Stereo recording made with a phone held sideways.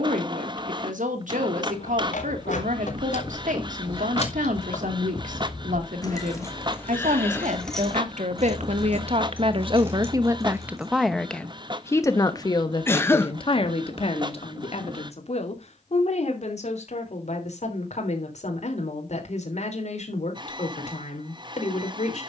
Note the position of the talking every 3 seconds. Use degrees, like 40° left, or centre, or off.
80° right, 80° right, 70° right, 20° right, 40° left, 60° left, 60° left, 60° left.